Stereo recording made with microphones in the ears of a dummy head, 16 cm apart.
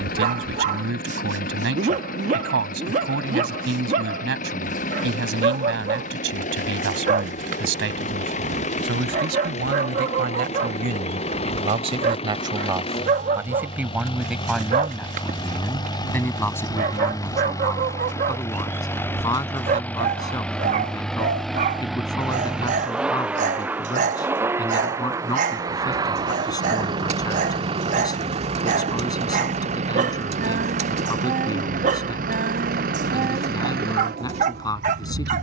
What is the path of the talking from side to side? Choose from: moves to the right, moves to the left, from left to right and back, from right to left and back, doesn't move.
moves to the left.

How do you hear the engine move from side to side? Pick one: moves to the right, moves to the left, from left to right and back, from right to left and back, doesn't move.
moves to the right.